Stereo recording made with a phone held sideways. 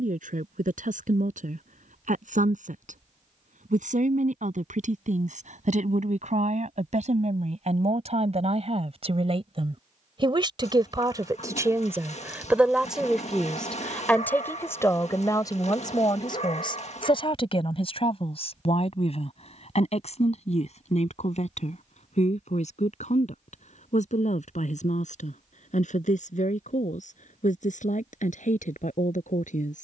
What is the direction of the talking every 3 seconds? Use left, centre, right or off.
right, right, right, right, centre, left, left, left, left, left.